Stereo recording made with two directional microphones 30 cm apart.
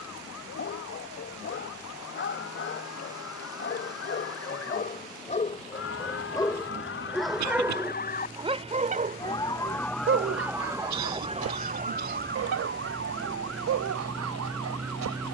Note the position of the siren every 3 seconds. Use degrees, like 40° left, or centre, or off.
60° left, 60° left, 40° left, 10° right, 50° right.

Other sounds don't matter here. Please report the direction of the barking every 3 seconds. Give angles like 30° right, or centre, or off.
40° left, 30° left, centre, 40° right, 60° right.